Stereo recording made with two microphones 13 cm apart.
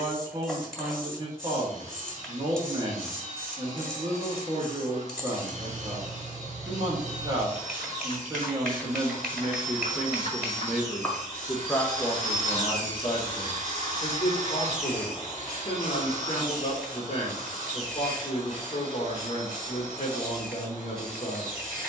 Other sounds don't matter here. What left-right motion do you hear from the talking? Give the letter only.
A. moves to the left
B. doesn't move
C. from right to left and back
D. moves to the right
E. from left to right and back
A.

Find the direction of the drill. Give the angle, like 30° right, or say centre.
70° right.